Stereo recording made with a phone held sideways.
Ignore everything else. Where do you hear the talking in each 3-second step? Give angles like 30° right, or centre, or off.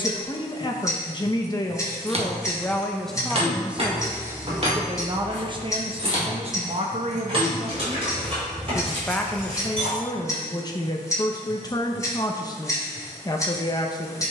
20° left, 20° right, 40° right, 20° left, 30° left.